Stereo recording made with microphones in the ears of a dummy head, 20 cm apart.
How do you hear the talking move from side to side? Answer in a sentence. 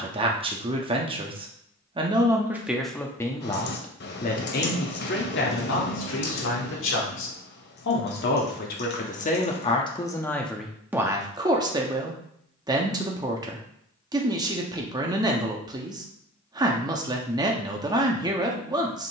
You can hear the talking move from right to left and back again.